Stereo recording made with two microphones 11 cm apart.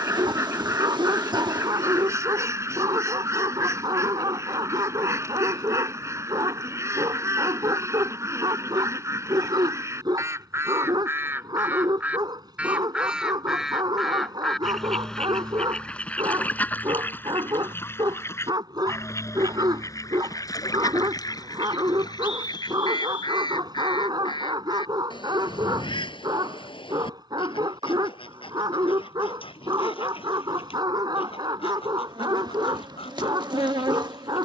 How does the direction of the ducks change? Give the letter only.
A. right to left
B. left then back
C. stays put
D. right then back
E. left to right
A.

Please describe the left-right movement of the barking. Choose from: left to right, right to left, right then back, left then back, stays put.
stays put.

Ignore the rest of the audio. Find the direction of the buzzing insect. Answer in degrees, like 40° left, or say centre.
40° right.